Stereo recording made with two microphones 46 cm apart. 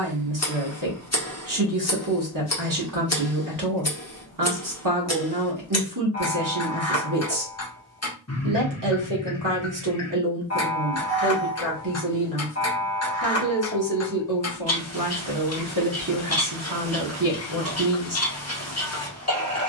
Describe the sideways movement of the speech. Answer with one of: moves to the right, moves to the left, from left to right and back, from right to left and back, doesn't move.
doesn't move.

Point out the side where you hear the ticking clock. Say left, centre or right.
left.